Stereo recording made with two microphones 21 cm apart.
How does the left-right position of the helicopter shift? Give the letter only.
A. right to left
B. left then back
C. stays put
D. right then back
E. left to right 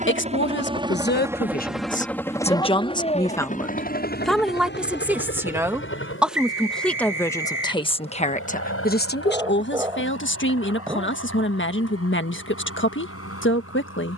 A.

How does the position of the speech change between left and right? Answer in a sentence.
You can hear the speech move from left to right and back again.